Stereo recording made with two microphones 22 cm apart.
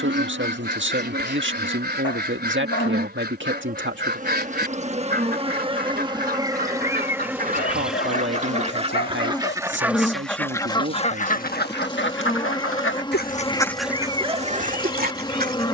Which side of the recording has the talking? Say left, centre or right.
right.